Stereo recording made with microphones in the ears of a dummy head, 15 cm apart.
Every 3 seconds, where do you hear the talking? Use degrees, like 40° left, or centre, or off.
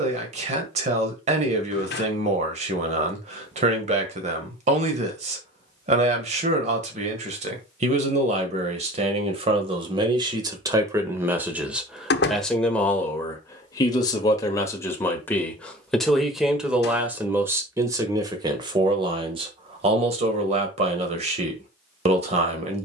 40° right, 40° right, 40° right, 20° right, 10° left, centre, 30° right, 40° right.